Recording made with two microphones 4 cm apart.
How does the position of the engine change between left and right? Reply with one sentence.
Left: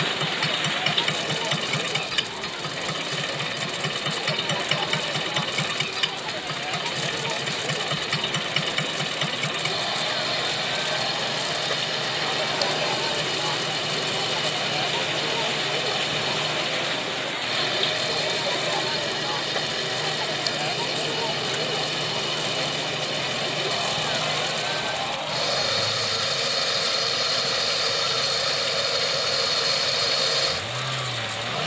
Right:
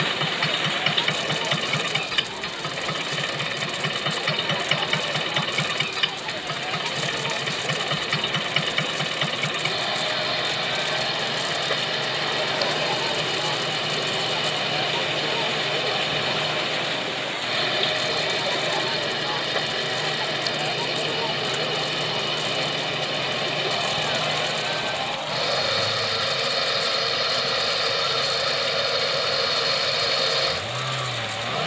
In this clip you hear the engine stay put.